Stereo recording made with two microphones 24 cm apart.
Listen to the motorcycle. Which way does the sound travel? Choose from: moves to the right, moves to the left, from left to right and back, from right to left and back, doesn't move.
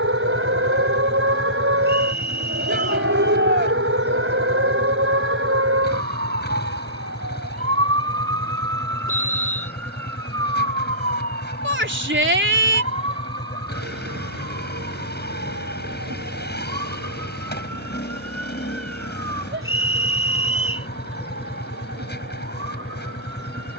doesn't move.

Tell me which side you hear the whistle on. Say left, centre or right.
left.